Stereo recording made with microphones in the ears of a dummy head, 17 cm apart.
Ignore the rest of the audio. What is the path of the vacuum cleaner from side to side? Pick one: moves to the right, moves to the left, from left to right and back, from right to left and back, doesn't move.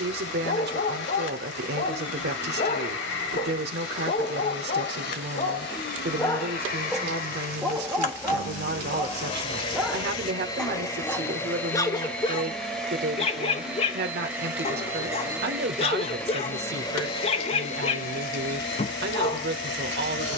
from left to right and back.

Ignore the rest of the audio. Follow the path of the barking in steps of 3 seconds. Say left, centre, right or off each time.
left, left, centre, centre, left, left, left.